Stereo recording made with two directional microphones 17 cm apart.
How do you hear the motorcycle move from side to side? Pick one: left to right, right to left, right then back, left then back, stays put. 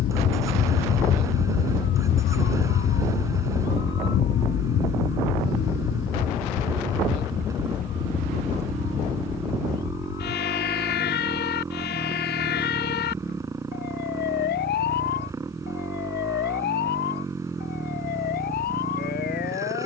stays put.